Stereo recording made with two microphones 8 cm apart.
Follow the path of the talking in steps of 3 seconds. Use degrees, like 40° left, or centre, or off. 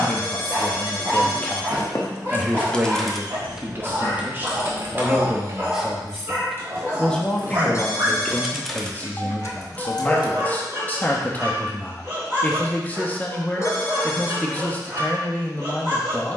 10° left, 20° right, 10° left, 20° left, 20° left, 20° left.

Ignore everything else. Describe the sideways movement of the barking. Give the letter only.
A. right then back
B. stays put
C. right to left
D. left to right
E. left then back
B.